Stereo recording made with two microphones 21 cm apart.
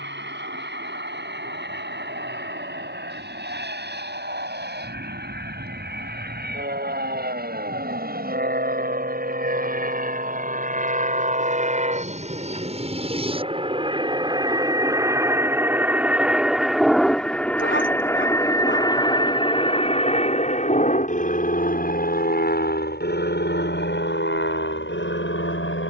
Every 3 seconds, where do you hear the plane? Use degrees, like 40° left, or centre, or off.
60° right, 60° right, 50° right, 40° right, 30° right, centre, 20° left, 40° left, 60° left.